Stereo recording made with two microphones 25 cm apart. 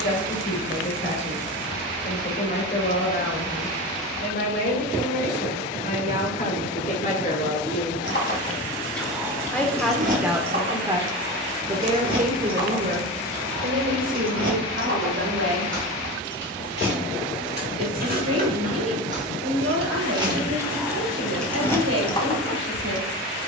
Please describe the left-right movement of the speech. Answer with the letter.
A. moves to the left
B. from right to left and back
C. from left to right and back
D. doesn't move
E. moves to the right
E.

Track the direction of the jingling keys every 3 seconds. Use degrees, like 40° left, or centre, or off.
off, off, 30° left, 30° right, 50° right, 40° right, 20° right, 10° left.